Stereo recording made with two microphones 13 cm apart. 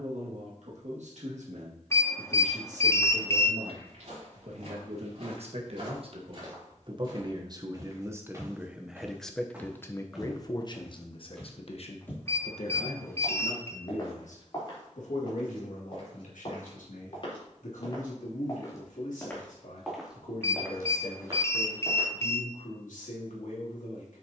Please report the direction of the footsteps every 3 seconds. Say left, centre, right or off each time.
off, right, right, centre, left, left, centre, right.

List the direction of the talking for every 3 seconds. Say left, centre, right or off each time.
right, right, right, left, left, left, left, left.